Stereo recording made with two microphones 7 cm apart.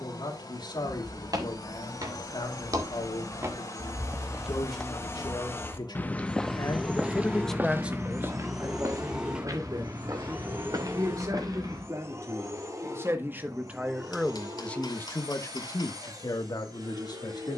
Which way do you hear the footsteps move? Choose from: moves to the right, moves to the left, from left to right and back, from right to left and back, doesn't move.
from right to left and back.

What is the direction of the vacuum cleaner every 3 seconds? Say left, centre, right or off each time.
left, left, centre, right, right, right.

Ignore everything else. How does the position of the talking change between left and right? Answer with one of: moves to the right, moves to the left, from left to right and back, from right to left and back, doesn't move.
from left to right and back.